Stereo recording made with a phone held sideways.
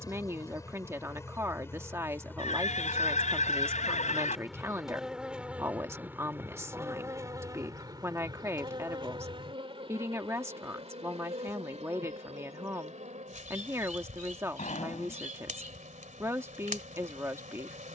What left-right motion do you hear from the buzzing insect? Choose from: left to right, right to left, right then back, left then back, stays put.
left to right.